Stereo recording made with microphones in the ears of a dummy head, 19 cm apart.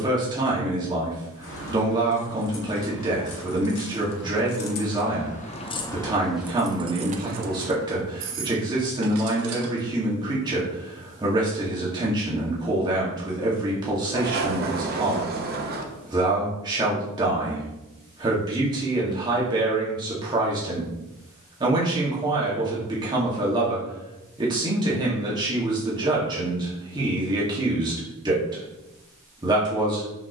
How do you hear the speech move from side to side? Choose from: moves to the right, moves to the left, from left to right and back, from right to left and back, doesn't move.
doesn't move.